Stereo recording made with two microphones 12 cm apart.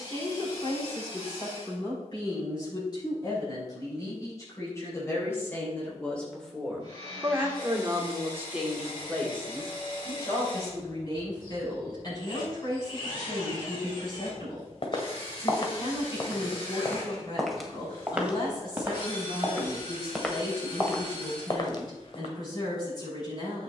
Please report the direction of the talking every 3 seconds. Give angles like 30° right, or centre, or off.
40° left, 20° left, 10° right, 30° left, 40° left, 40° left, 40° left, 40° left.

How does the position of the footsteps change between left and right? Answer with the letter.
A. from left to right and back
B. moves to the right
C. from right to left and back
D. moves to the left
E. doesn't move
A.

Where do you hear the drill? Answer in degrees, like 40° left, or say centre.
40° left.